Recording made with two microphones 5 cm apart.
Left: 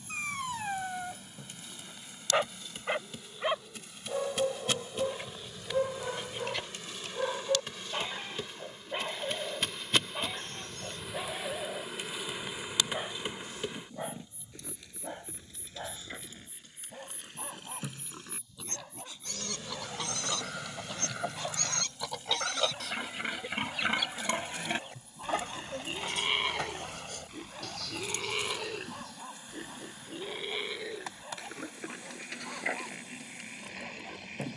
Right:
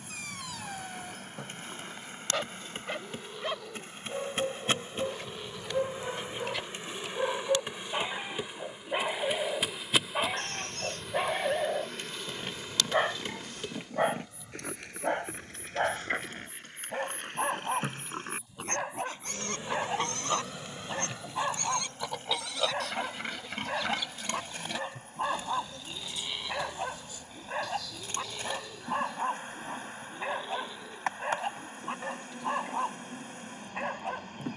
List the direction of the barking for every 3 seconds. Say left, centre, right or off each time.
left, centre, centre, right, right, right, right, right, right, right, right, right.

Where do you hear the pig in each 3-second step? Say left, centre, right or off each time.
right, right, right, right, right, right, right, centre, left, left, left, left.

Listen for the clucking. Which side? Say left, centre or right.
left.